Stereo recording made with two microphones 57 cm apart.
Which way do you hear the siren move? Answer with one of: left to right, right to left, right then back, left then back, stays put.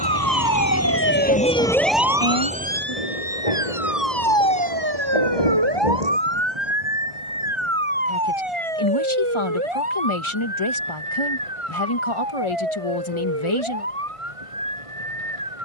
left to right.